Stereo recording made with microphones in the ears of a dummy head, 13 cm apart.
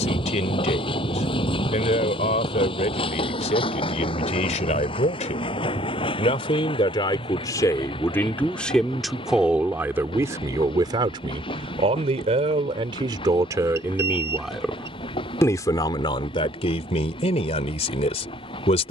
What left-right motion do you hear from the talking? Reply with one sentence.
You can hear the talking go right and come back.